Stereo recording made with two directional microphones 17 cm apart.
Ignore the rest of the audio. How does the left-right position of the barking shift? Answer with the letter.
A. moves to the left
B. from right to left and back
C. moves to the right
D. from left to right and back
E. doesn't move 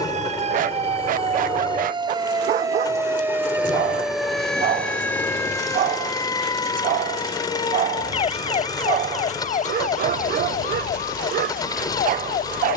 E.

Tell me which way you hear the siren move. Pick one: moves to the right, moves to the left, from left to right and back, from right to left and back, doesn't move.
moves to the left.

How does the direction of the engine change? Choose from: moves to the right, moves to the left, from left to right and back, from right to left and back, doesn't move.
doesn't move.